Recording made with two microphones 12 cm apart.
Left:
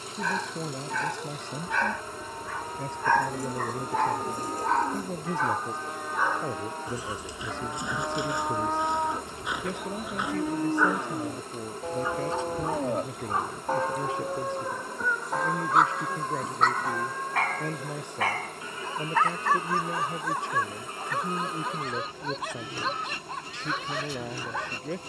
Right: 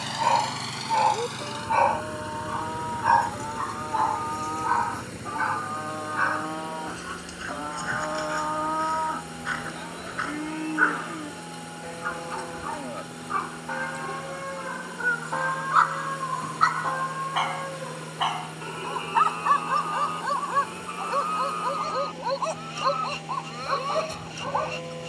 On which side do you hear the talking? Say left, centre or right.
left.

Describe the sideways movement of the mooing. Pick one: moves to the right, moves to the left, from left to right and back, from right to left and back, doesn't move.
from right to left and back.